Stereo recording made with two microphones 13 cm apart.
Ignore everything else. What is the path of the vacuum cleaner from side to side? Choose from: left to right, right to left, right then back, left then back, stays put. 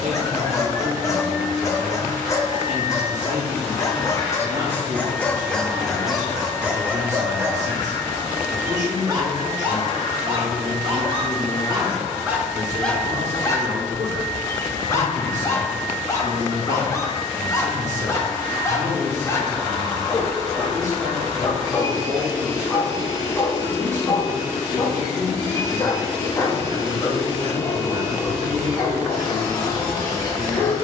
stays put.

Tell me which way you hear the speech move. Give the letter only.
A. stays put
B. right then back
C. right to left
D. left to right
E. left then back
A.